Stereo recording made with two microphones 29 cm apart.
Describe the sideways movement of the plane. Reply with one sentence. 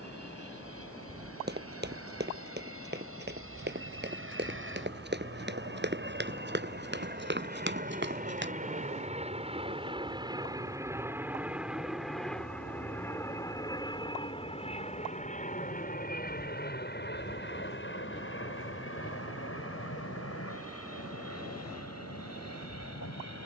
In this clip you hear the plane move to the left.